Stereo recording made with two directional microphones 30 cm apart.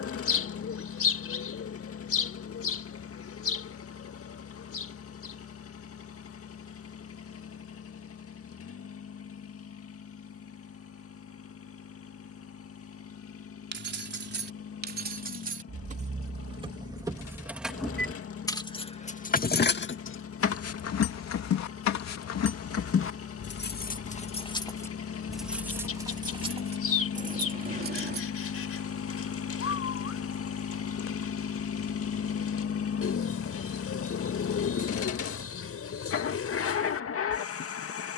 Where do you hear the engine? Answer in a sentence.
In this clip you hear the engine on the left.